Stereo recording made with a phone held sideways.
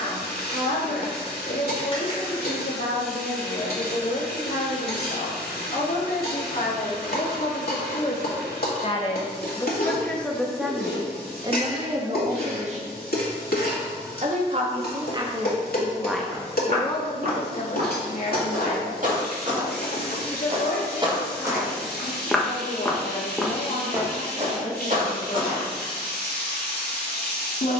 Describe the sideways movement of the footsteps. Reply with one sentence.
You can hear the footsteps go left and come back.